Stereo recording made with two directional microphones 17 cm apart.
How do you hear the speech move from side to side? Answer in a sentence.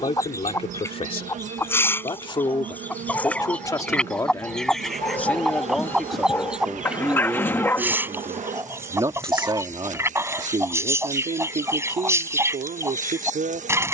In this clip you hear the speech move to the right.